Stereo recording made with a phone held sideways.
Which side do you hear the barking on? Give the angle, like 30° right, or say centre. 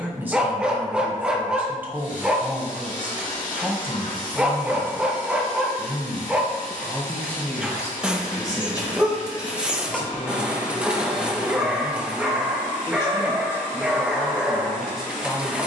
10° right.